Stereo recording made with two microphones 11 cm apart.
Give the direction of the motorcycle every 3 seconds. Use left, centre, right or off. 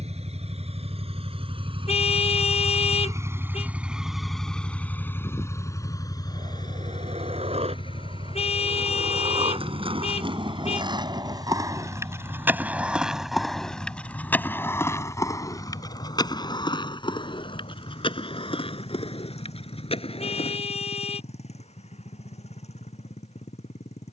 right, centre, left, left, left, left, left, left.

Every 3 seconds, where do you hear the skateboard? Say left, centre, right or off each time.
off, off, right, right, centre, left, left, off.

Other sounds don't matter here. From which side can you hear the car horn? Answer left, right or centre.
left.